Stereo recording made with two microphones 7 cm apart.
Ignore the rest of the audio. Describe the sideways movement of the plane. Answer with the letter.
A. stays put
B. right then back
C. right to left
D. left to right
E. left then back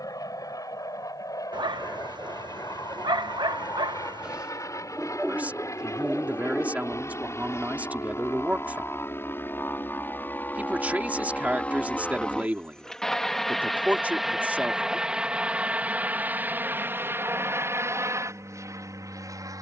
D.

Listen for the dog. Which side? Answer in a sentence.
You can hear the dog on the right.